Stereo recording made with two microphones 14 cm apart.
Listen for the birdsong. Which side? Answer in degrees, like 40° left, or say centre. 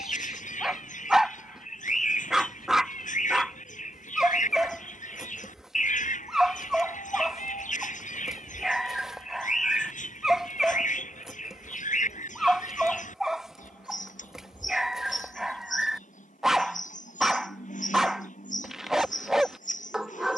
60° left.